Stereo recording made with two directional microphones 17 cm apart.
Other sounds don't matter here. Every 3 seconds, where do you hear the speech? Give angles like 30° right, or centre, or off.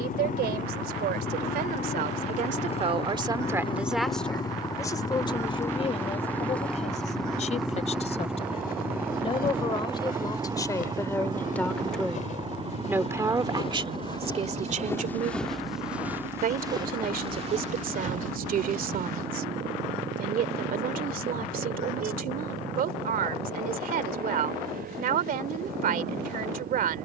60° right, 10° left, 40° left, 20° left, 30° right, 50° right, 60° right, 60° right, 60° right.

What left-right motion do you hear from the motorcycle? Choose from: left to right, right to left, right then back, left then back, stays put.
left to right.